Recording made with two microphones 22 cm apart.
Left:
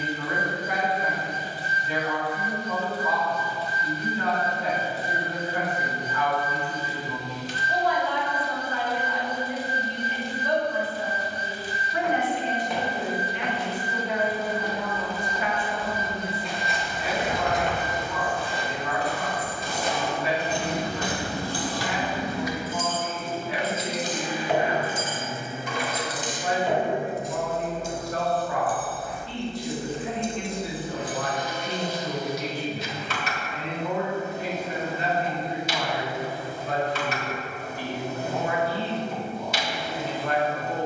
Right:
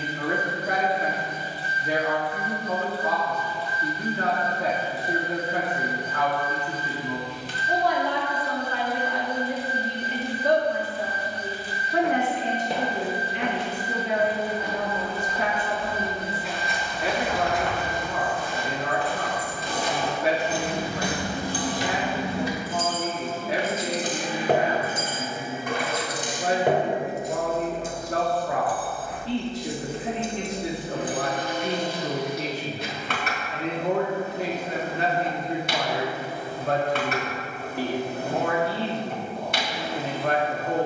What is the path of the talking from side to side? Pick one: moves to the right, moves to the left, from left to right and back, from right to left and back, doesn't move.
doesn't move.